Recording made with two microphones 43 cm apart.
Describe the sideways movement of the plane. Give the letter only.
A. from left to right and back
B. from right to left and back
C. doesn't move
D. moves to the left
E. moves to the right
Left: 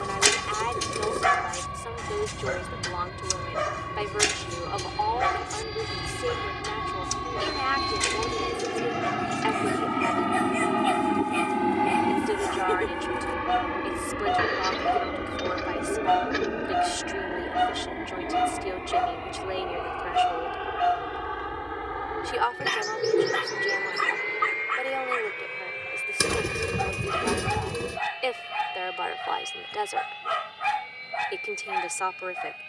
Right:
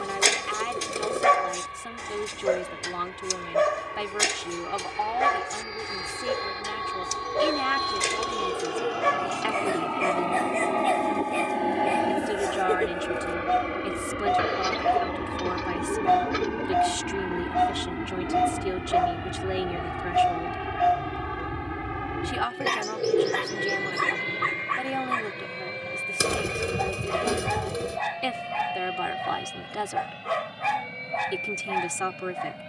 E.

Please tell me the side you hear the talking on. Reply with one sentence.
You can hear the talking on the right.